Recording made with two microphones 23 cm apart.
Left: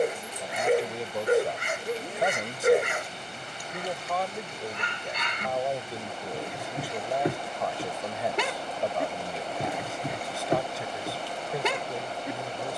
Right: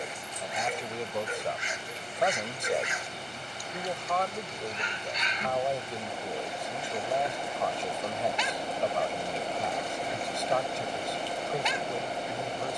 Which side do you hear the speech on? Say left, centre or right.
centre.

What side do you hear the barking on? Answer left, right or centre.
left.